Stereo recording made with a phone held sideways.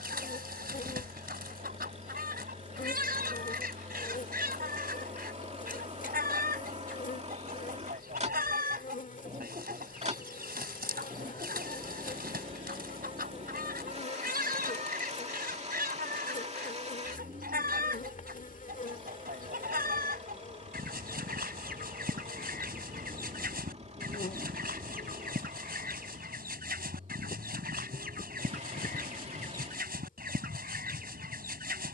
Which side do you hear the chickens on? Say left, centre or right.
right.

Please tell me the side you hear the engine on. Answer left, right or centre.
right.